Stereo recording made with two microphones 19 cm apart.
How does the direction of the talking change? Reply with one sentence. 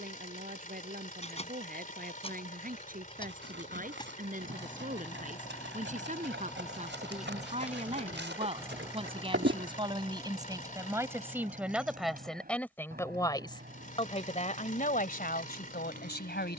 You can hear the talking go from the right side to the left.